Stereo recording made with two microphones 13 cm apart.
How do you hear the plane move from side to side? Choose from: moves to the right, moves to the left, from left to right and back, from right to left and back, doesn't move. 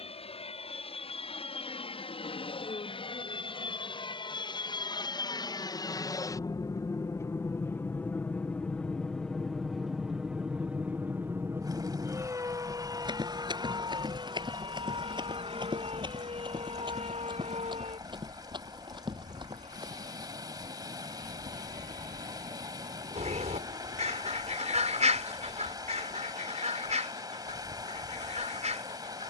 moves to the right.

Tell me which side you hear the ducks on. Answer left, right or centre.
right.